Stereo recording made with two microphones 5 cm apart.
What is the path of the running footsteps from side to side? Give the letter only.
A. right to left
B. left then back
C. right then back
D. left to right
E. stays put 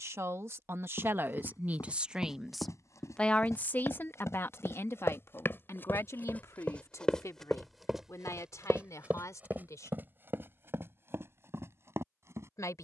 D.